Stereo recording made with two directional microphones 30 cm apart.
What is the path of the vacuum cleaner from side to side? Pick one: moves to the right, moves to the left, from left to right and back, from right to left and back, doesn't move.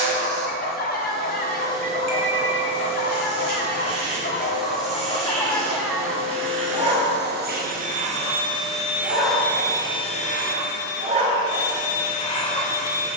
moves to the left.